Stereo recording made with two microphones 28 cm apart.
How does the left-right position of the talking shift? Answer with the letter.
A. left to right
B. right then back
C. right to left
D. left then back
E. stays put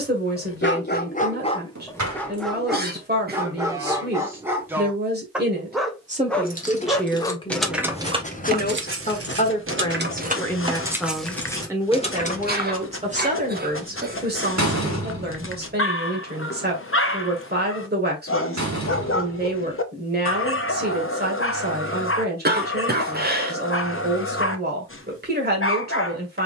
D.